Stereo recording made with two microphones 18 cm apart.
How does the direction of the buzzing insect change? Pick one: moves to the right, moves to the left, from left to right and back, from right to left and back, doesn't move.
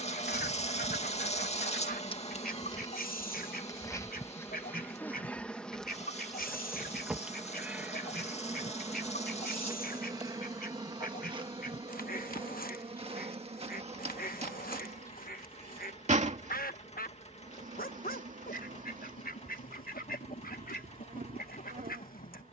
moves to the right.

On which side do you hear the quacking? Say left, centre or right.
left.